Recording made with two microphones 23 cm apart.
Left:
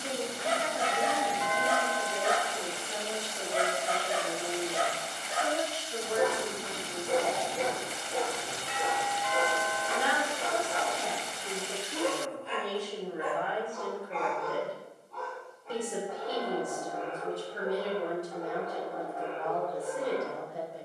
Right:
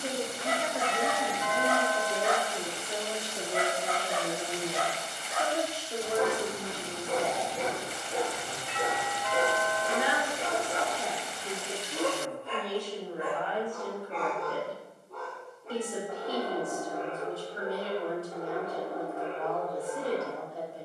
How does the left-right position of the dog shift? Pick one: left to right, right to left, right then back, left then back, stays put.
left to right.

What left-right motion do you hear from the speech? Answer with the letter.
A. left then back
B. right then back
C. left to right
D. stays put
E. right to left
E.